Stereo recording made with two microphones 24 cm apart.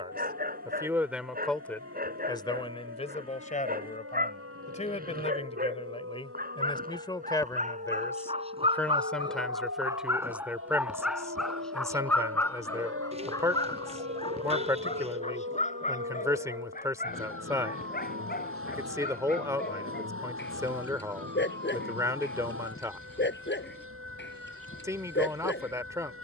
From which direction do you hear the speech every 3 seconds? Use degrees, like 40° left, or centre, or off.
centre, 30° left, 10° left, 10° right, 10° right, 10° right, 10° right, 10° right, 10° right.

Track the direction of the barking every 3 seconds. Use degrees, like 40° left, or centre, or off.
40° right, 40° right, 30° right, 10° right, 20° left, 30° left, 40° left, 50° left, 50° left.